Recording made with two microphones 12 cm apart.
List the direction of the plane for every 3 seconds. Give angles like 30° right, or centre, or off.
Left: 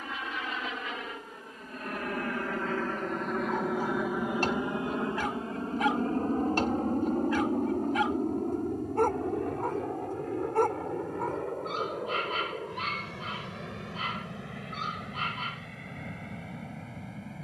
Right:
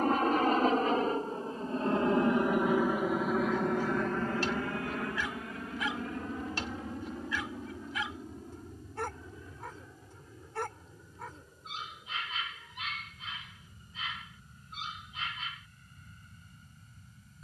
30° right, 20° left, 50° left, 60° left, 70° left, 70° left.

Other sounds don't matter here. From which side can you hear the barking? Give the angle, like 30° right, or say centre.
50° left.